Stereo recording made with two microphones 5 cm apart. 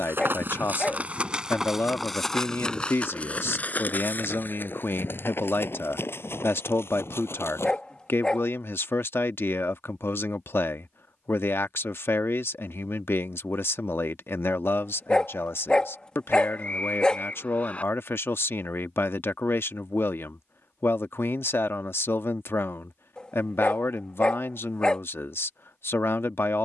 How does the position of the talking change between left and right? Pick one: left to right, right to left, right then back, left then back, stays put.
stays put.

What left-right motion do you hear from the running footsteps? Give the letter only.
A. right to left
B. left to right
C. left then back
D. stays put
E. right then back
A.